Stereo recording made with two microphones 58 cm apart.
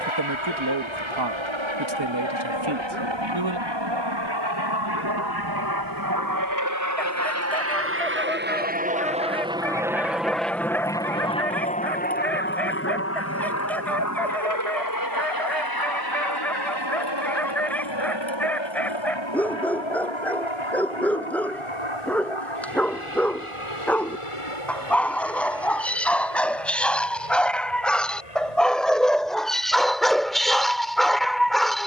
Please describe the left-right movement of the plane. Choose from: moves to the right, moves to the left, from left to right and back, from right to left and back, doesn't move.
moves to the left.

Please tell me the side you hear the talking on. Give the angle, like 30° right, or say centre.
50° right.